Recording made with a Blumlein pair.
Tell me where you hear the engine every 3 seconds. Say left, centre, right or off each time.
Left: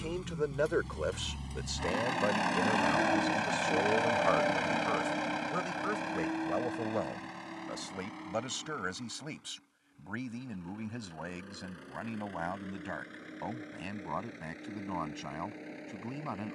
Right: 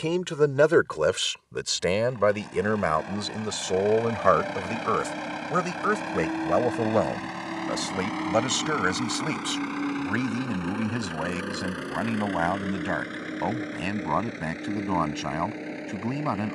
left, centre, right, right, right, right.